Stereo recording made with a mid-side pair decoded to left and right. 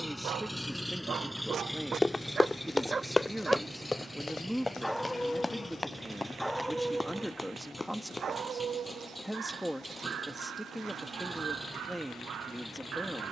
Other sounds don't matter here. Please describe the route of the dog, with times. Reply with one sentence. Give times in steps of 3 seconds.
You can hear the dog on the right from 0 s, in the centre from 3 s and on the right from 6 s.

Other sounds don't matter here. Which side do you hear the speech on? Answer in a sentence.
In this clip you hear the speech in the centre.